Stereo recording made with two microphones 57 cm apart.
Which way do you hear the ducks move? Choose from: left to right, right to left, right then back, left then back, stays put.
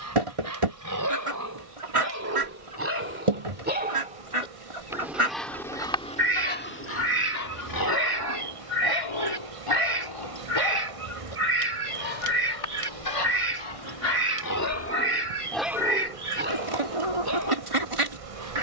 stays put.